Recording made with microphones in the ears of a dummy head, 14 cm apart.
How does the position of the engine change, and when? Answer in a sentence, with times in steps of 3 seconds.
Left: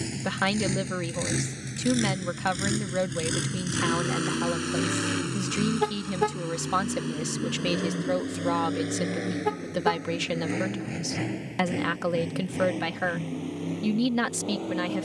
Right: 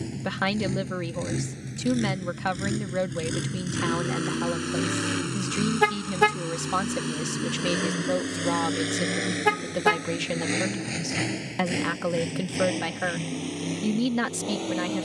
In this clip you hear the engine on the left from 0 s, in the centre from 3 s and on the right from 6 s.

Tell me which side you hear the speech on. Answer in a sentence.
In this clip you hear the speech in the centre.